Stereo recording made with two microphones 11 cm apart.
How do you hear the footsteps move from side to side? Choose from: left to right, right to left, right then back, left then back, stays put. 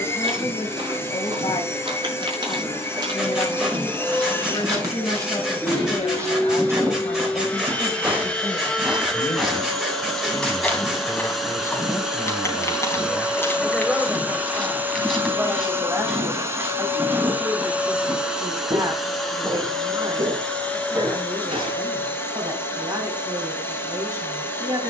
left then back.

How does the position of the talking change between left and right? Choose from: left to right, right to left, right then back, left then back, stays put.
left to right.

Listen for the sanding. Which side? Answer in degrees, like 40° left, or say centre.
10° right.